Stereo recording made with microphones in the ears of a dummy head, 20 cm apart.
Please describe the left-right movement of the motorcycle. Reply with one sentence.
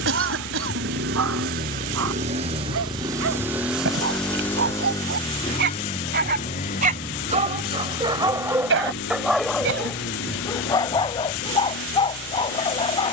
You can hear the motorcycle go from the right side to the left.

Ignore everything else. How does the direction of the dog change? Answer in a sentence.
In this clip you hear the dog move from right to left.